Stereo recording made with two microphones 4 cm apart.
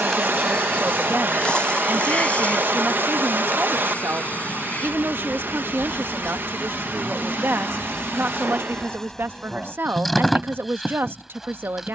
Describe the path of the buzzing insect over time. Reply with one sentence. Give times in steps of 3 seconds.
In this clip you hear the buzzing insect on the left from 0 s and in the centre from 9 s.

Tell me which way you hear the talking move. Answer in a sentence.
You can hear the talking stay in one place.